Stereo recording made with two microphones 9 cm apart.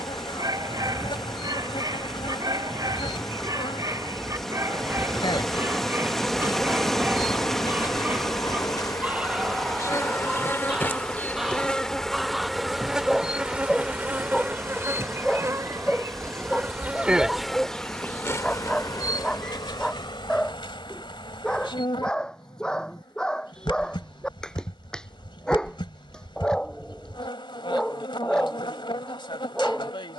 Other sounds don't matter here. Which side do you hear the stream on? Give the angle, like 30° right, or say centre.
centre.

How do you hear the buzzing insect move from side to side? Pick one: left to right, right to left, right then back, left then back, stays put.
right then back.